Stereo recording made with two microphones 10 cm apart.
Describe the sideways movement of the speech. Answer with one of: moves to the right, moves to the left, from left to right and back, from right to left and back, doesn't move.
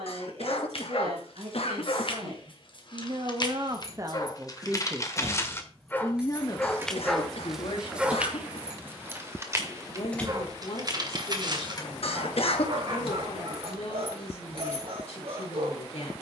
moves to the left.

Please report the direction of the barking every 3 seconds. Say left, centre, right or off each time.
left, left, centre, right, right, right.